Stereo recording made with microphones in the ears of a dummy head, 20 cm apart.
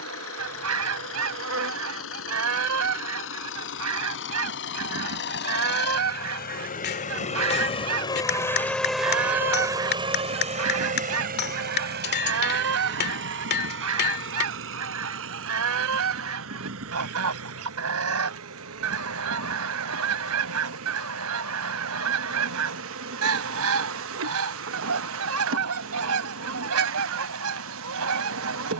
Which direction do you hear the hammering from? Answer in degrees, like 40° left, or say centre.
50° left.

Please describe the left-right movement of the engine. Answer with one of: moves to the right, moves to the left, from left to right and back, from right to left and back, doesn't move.
moves to the right.